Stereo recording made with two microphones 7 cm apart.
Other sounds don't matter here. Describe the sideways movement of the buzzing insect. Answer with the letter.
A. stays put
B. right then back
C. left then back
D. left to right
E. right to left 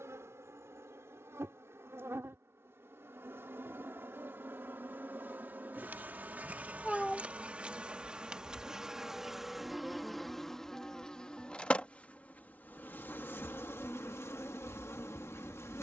E.